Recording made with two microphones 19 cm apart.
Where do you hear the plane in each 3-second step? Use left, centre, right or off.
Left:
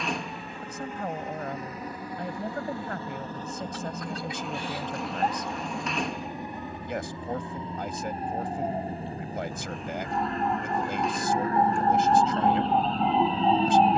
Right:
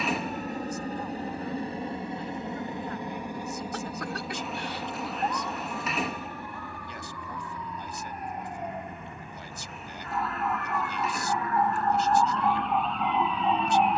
right, centre, left, left, left.